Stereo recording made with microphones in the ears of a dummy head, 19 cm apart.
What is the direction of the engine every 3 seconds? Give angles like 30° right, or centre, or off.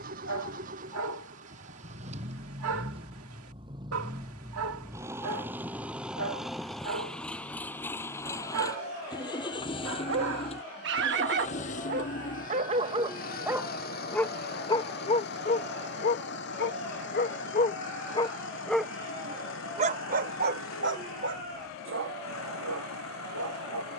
40° right, 20° right, 10° left, 30° left, 40° left, 60° left, 60° left, 70° left.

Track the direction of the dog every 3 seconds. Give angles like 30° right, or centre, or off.
70° right, 70° right, 70° right, 60° right, 10° right, 40° left, 30° right, 70° right.